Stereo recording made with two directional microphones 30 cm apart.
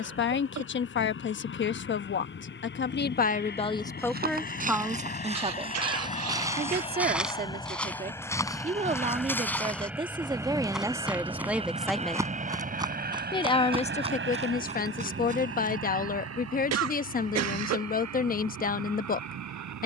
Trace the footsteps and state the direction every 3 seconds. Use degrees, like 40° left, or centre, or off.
off, 20° right, centre, centre, 20° right, 30° right, off.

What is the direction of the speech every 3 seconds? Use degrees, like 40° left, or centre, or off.
40° left, centre, 30° right, 10° right, 20° left, 30° left, 30° left.